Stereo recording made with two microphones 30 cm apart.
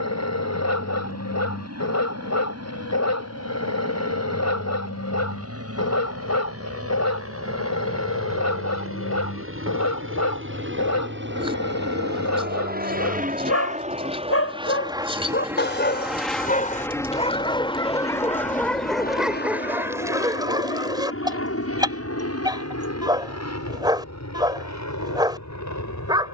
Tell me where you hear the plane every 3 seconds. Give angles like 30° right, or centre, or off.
70° right, 60° right, 60° right, 50° right, 30° right, centre, 30° left, 50° left, 60° left.